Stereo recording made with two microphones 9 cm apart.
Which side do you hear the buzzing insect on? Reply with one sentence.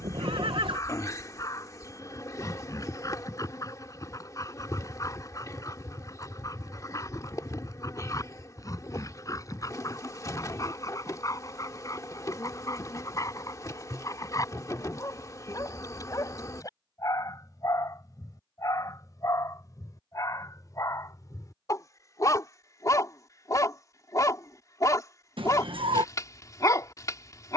You can hear the buzzing insect on the left.